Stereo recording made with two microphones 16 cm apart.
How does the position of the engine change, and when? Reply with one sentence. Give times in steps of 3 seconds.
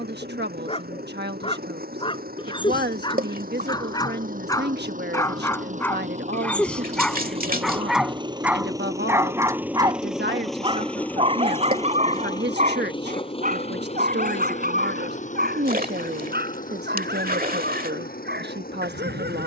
In this clip you hear the engine on the right from 0 s, in the centre from 9 s and on the left from 12 s.